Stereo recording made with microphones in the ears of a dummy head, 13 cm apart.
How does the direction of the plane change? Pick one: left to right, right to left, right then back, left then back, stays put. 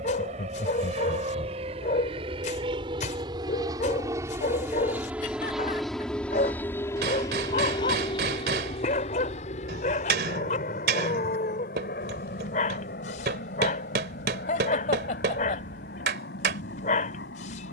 right to left.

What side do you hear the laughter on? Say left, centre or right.
left.